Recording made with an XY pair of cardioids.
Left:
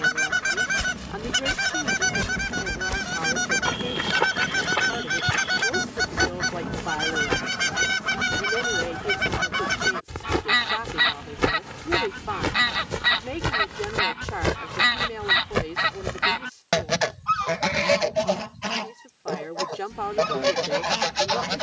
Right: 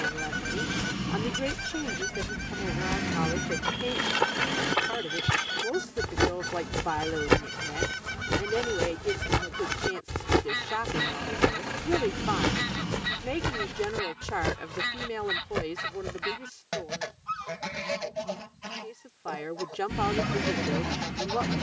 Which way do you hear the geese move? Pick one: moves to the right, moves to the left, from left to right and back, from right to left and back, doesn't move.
doesn't move.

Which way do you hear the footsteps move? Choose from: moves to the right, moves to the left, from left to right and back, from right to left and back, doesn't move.
from left to right and back.